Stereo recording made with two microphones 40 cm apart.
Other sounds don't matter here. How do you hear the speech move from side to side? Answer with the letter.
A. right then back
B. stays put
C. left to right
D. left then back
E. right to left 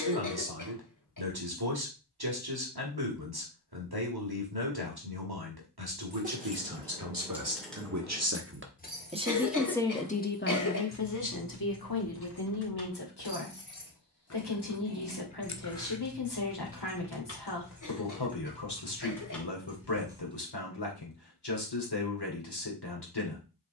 E.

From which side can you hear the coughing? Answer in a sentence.
You can hear the coughing on the left.